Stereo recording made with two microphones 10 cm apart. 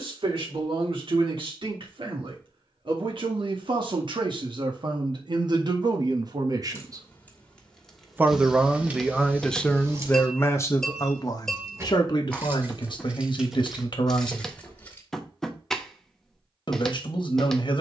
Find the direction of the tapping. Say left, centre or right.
centre.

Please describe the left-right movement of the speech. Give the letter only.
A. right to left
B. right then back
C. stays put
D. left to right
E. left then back
A.